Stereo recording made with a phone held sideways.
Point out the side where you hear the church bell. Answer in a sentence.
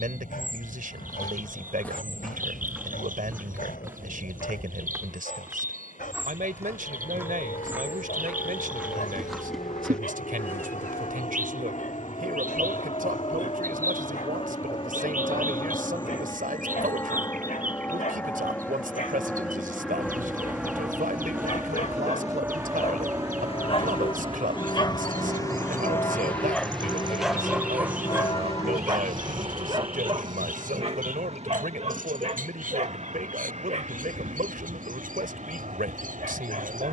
In this clip you hear the church bell on the left.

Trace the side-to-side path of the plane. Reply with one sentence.
In this clip you hear the plane move from left to right.